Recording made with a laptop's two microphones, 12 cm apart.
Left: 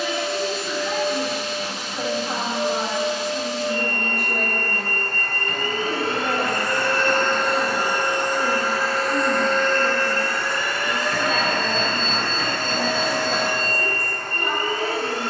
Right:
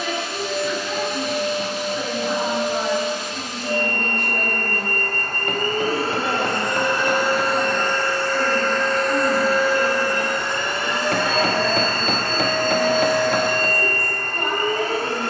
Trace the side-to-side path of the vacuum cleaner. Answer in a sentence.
You can hear the vacuum cleaner go left and come back.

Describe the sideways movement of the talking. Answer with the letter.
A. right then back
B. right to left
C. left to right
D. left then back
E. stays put
C.